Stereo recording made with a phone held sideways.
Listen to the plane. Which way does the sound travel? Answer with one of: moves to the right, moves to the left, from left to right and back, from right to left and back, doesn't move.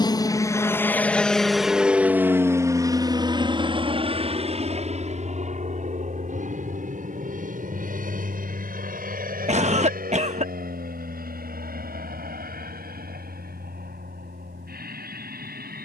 moves to the right.